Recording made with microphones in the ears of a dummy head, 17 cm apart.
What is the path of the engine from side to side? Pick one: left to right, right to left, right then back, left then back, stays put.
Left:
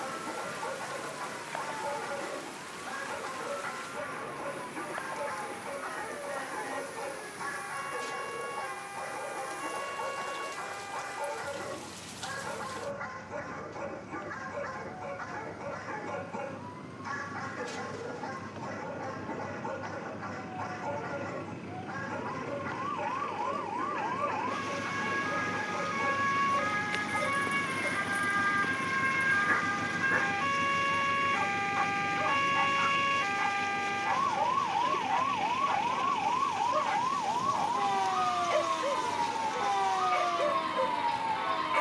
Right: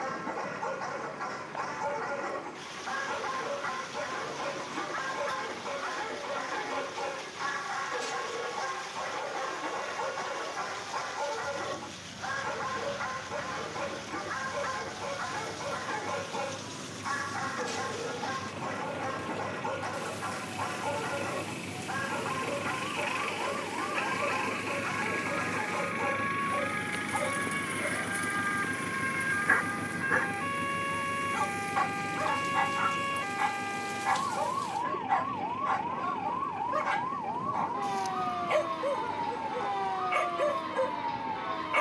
right to left.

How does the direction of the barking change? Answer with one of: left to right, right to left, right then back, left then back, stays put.
stays put.